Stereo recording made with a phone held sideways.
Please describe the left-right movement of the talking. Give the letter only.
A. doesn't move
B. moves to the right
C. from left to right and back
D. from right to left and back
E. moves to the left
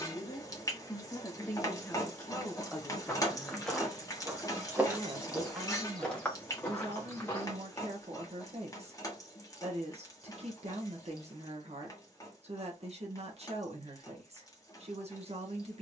B.